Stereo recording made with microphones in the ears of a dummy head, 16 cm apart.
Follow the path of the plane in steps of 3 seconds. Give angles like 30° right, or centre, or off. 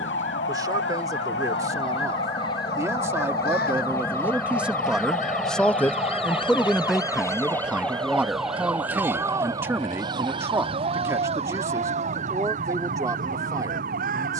40° left, 10° left, 20° right, 40° right, 50° right.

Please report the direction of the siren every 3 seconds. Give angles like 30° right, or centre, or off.
70° left, 50° left, 10° left, 30° right, 50° right.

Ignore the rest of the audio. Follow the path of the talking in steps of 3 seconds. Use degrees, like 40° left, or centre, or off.
20° right, 10° right, centre, 20° right, 20° right.